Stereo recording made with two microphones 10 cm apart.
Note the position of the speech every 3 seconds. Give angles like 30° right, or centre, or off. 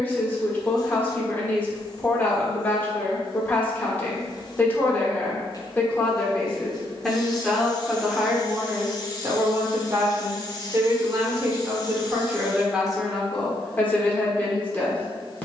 20° left, 20° left, centre, 30° right, centre.